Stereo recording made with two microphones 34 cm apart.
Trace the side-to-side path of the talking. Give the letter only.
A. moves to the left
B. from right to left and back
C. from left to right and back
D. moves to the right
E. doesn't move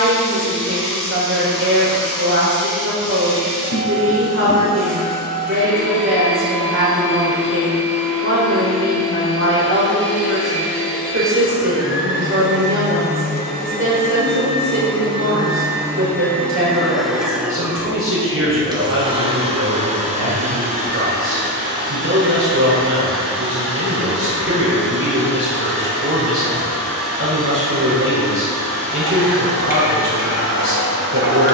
E.